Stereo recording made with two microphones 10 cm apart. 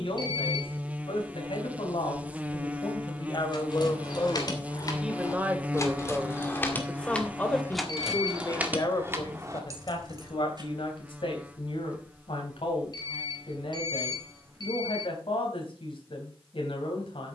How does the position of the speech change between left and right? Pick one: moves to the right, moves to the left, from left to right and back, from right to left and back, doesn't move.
from left to right and back.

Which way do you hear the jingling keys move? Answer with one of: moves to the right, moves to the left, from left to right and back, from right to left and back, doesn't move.
moves to the right.